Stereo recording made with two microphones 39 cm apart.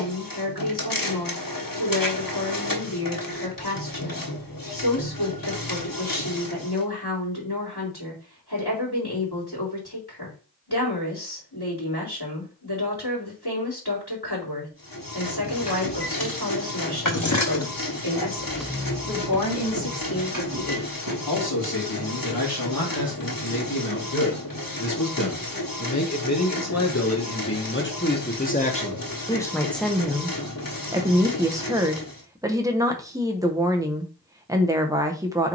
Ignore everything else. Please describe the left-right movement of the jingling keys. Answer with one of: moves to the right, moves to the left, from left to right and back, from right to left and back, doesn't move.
moves to the right.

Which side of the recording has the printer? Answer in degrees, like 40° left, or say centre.
60° left.